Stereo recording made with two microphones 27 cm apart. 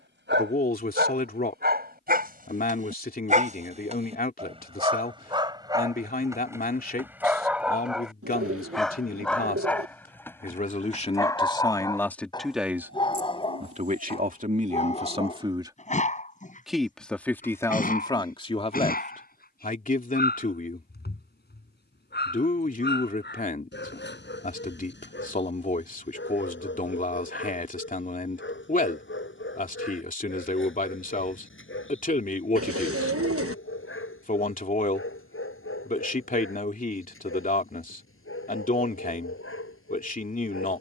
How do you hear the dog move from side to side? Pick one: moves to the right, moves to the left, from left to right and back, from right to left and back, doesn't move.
moves to the left.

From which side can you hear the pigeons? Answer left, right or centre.
right.